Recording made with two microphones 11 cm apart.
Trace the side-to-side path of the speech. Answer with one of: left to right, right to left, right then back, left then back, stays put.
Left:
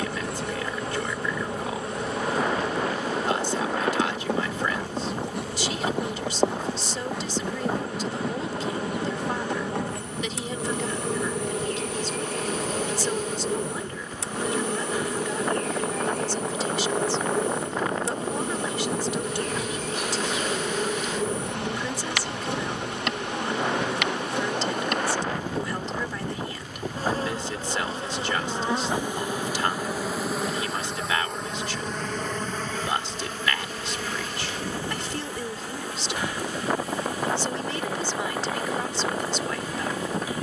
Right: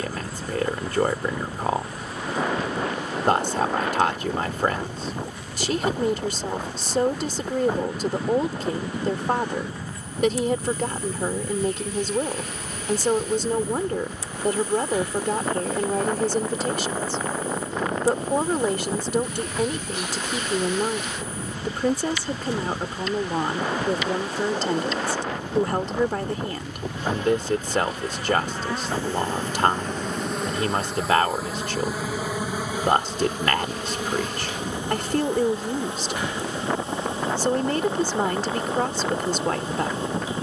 stays put.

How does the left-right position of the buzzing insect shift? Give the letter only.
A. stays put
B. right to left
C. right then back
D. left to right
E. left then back
D.